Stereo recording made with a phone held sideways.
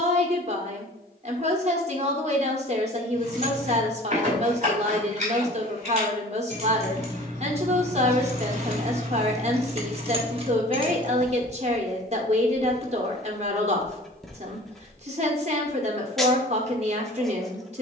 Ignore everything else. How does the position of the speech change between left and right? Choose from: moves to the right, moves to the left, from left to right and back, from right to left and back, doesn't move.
doesn't move.